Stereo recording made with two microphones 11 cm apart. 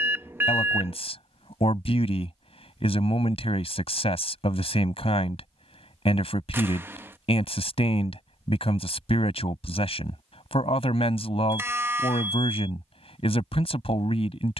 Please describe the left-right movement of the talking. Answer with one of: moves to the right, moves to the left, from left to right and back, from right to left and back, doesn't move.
doesn't move.